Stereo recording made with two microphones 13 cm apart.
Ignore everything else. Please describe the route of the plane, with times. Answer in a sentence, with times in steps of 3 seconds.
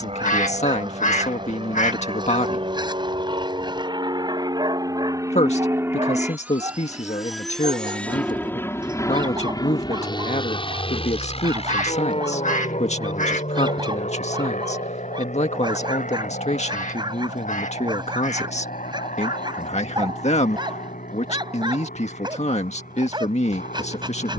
In this clip you hear the plane on the right from 0 s, in the centre from 6 s and on the left from 9 s.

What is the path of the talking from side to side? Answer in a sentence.
In this clip you hear the talking stay put.